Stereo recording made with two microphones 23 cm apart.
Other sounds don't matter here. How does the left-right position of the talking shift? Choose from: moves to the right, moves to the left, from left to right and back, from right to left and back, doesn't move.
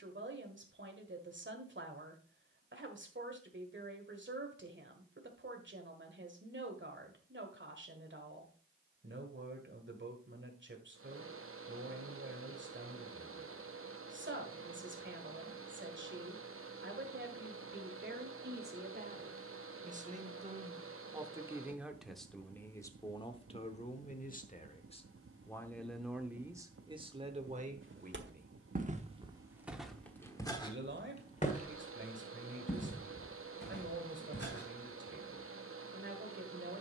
from right to left and back.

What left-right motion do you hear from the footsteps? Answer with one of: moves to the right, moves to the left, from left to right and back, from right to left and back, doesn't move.
moves to the left.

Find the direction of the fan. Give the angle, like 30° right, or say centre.
70° right.